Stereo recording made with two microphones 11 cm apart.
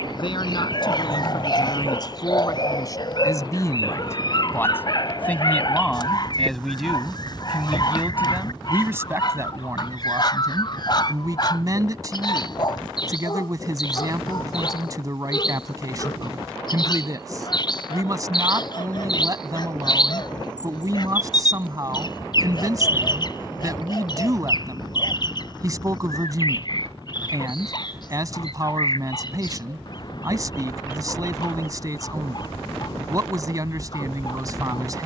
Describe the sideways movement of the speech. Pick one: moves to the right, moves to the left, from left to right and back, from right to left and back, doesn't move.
moves to the right.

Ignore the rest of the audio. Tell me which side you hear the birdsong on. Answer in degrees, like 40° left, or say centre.
40° left.